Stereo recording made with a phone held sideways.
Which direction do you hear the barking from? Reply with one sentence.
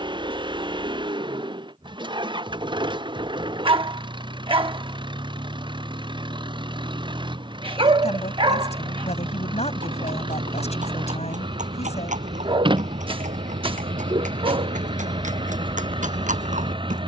You can hear the barking on the right.